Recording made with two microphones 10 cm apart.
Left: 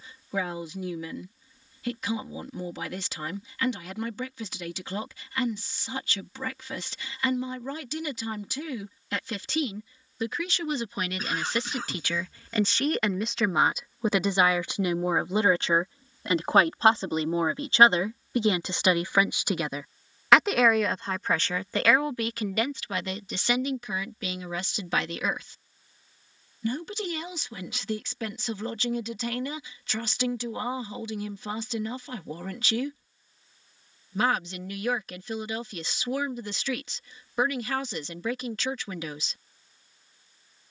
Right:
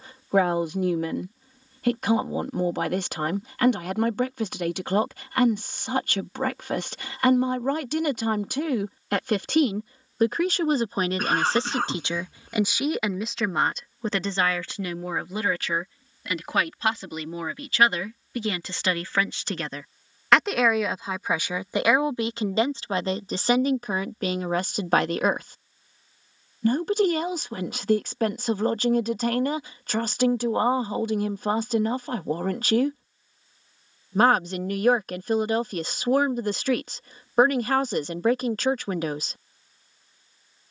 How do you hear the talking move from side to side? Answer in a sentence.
In this clip you hear the talking go left and come back.